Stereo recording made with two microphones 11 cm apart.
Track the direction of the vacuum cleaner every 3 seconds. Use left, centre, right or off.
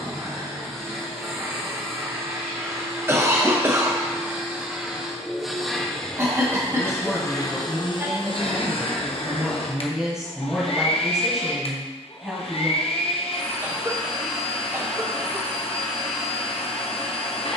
right, centre, left, left, left, left.